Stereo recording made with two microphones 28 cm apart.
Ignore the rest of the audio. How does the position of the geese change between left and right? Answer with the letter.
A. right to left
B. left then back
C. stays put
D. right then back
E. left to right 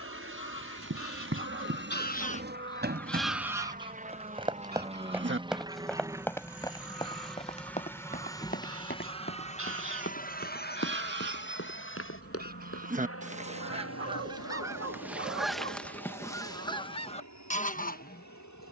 D.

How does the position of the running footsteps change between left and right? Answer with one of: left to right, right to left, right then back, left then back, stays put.
right to left.